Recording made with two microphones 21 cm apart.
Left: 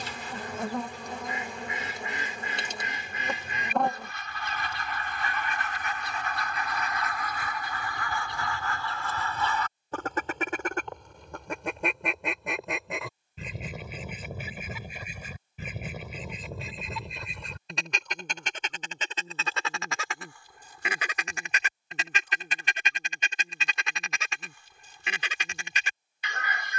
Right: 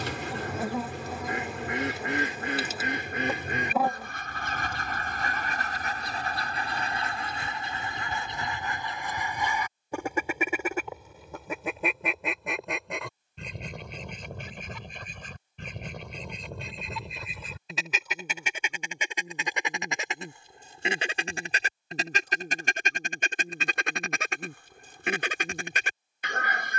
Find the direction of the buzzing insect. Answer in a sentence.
You can hear the buzzing insect in the centre.